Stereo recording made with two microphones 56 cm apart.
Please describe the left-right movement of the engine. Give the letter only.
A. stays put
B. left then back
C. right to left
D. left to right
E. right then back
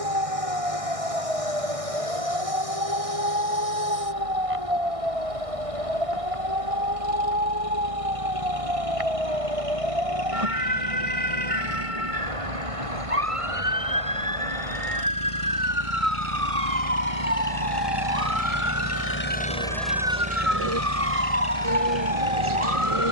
D.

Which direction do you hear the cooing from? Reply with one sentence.
You can hear the cooing on the right.